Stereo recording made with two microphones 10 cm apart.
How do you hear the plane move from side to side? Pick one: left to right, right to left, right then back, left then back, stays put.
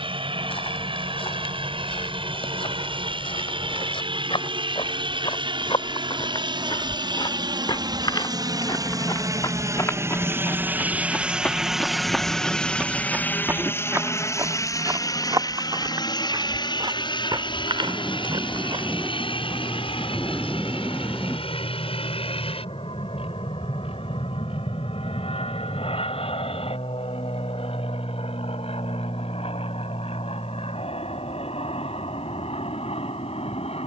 right to left.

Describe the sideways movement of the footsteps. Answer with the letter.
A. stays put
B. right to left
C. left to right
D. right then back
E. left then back
C.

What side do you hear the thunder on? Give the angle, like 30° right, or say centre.
centre.